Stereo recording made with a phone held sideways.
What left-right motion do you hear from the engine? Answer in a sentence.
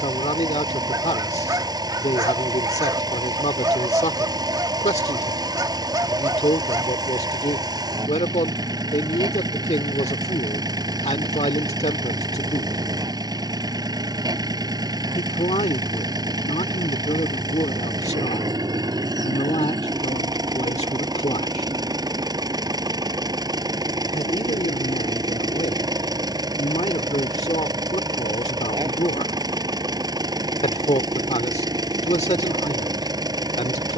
You can hear the engine stay in one place.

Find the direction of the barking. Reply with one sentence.
In this clip you hear the barking on the right.